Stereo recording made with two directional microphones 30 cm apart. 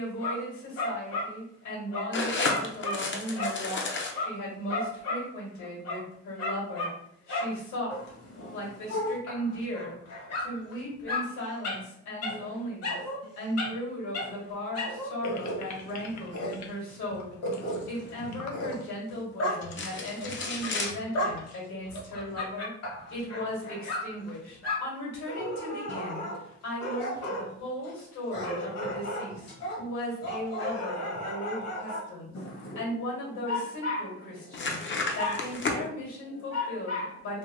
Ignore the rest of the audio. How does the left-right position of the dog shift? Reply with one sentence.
You can hear the dog stay put.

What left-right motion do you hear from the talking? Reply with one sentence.
You can hear the talking stay put.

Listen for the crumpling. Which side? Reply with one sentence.
You can hear the crumpling on the left.